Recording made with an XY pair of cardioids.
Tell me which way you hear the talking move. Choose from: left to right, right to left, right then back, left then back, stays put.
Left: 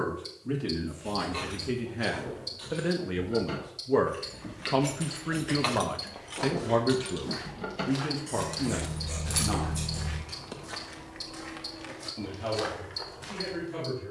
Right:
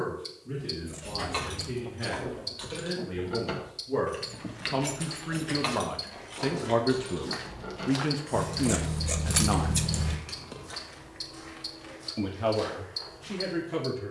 left to right.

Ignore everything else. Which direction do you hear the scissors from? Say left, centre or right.
right.